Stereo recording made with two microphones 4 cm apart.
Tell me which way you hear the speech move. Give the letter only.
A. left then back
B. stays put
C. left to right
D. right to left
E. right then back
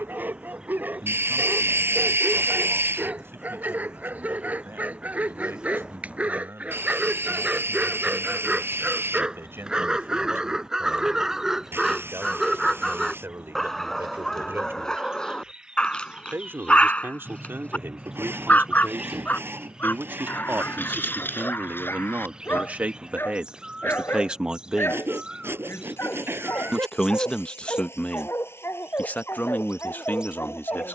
D.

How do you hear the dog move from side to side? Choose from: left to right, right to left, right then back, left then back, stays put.
right to left.